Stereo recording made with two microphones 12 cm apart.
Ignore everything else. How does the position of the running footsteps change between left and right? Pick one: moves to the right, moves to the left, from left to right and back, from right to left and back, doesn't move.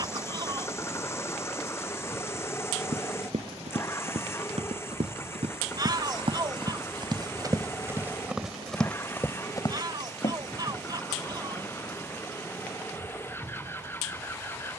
moves to the left.